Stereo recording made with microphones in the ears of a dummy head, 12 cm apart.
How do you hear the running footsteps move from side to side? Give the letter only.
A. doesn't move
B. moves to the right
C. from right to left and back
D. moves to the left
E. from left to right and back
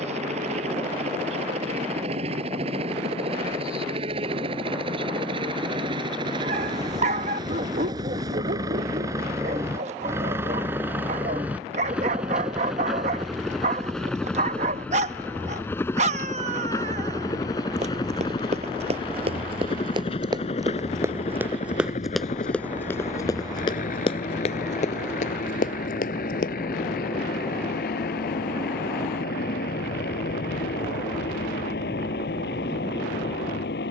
D.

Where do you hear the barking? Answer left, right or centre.
right.